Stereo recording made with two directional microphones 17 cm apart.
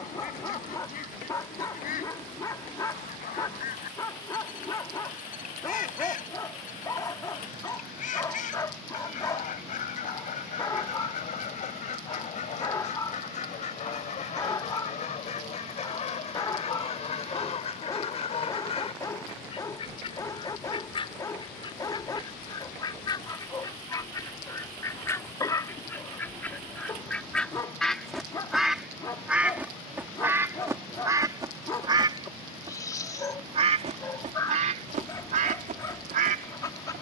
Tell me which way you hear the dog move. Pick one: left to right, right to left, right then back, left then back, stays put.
stays put.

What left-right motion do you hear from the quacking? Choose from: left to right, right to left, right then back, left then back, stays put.
left to right.